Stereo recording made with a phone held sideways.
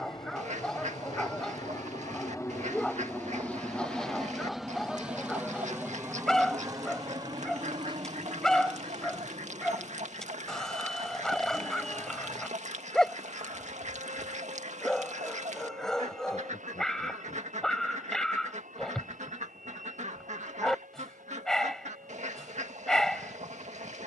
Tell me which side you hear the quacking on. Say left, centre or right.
right.